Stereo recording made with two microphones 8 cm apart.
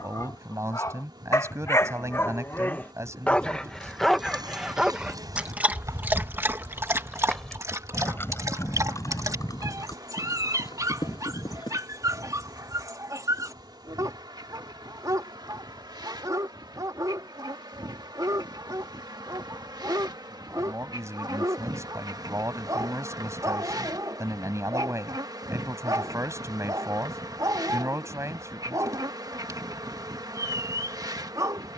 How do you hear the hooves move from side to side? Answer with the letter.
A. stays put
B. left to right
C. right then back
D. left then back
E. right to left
E.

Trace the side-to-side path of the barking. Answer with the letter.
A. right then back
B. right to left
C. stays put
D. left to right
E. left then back
D.